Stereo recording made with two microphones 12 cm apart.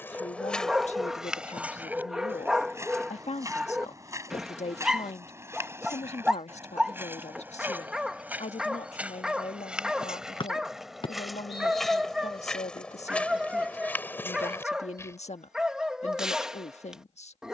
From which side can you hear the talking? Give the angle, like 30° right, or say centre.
70° left.